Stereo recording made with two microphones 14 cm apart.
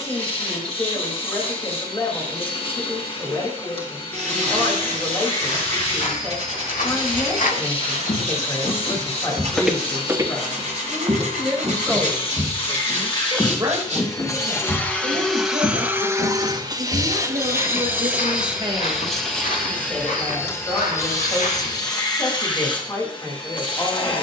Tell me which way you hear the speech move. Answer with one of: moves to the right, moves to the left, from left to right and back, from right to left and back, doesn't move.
from left to right and back.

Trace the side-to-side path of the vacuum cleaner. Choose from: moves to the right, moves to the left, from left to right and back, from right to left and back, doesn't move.
from left to right and back.